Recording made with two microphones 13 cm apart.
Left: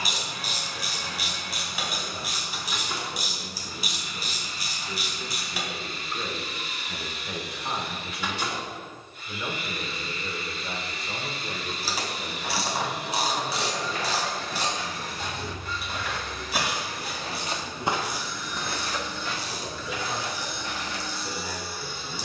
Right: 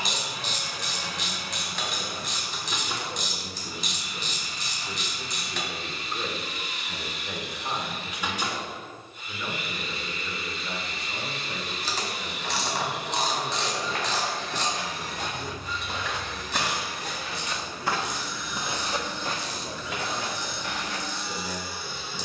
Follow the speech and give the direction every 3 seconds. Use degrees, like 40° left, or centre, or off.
50° right, 30° right, centre, 20° left, 40° left, 50° left, 50° left, 60° left.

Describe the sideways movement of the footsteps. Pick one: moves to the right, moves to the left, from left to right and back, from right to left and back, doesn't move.
from right to left and back.